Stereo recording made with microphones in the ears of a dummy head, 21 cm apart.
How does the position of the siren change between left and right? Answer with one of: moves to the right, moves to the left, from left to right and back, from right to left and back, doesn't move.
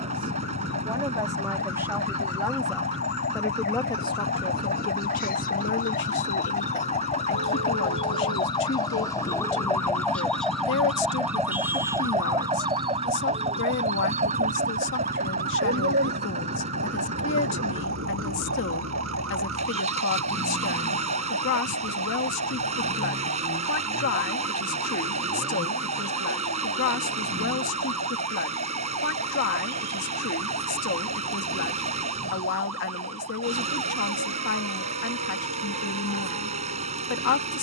moves to the right.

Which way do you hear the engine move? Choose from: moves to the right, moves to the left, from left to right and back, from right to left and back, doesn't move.
doesn't move.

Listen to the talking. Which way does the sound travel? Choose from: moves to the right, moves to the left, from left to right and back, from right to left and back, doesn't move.
moves to the left.